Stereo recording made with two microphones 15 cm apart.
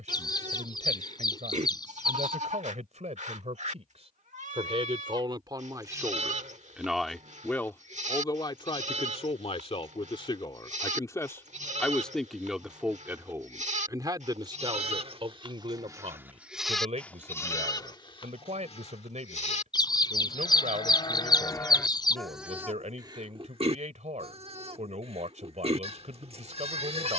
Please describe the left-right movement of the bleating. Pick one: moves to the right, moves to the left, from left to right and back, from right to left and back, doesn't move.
from right to left and back.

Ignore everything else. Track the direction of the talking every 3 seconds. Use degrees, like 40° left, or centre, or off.
50° right, 40° right, 10° left, 30° left, 20° right, 50° right, 50° right, 50° right, 50° right.